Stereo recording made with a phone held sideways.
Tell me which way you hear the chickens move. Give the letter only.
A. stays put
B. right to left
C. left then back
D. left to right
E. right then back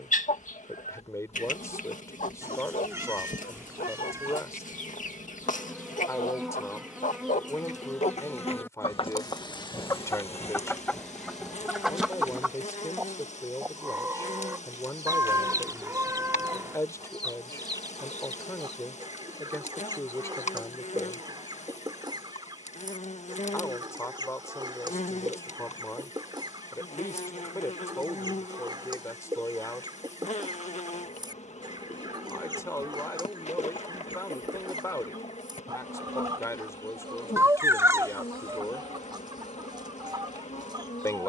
D.